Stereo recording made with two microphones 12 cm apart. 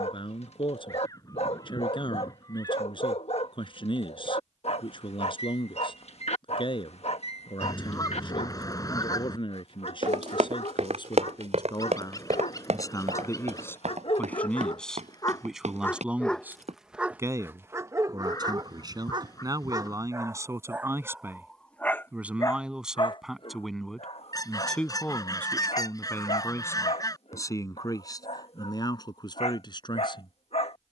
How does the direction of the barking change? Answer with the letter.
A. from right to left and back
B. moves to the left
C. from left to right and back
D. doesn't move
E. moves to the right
C.